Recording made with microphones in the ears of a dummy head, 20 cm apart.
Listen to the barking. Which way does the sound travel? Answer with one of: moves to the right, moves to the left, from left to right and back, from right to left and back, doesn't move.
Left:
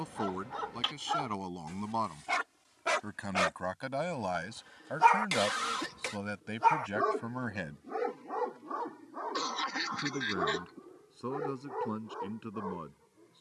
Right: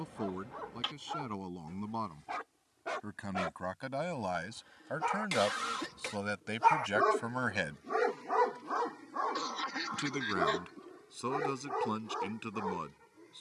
moves to the right.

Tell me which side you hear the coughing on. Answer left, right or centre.
centre.